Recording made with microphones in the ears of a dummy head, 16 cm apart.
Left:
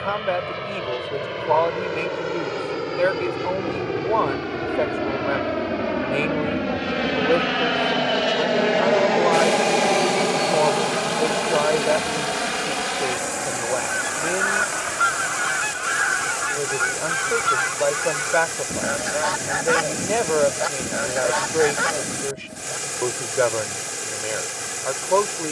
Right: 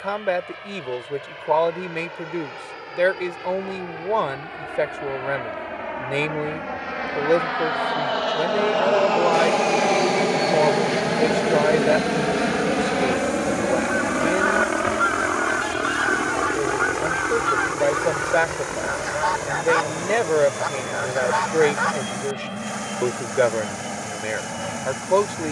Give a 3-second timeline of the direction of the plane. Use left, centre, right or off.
left, left, left, centre, right, right, right, right, right.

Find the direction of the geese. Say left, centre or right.
left.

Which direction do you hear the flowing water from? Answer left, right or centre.
left.